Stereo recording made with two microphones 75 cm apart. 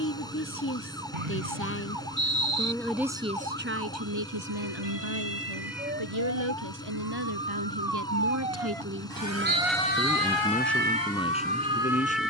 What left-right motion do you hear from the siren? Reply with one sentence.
In this clip you hear the siren travel towards the left.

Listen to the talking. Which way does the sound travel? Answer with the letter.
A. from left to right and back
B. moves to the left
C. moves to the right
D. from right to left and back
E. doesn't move
A.